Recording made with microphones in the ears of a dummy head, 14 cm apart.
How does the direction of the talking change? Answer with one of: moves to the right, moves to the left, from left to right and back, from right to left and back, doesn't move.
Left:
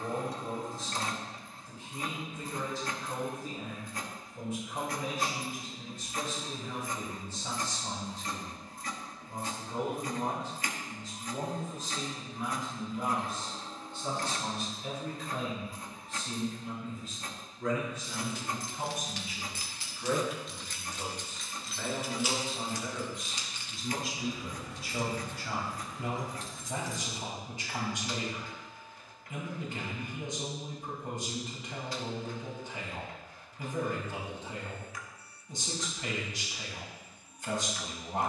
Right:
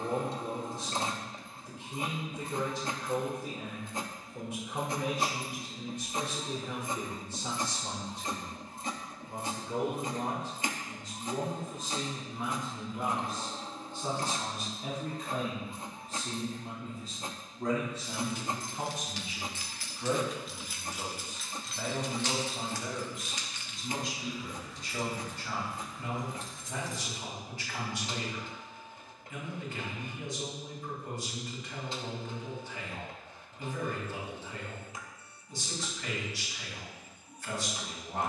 moves to the left.